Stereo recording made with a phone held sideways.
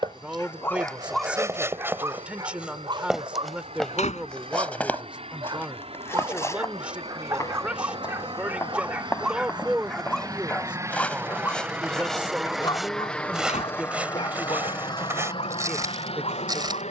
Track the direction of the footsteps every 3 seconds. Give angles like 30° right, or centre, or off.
20° right, 10° left, 20° left, 10° left, 10° right, 20° right.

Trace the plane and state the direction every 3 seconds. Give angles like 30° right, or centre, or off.
60° right, 60° right, 50° right, 30° right, 10° left, 40° left.